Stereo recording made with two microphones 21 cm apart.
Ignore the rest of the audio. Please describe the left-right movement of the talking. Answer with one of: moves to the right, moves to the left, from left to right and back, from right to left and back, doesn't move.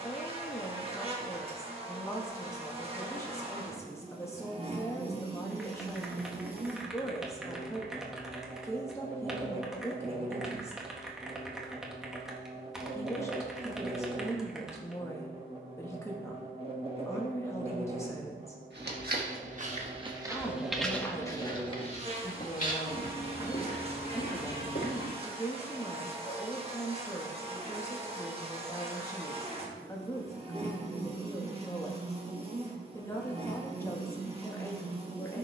doesn't move.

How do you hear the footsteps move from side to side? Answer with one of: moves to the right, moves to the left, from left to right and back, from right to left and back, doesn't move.
moves to the left.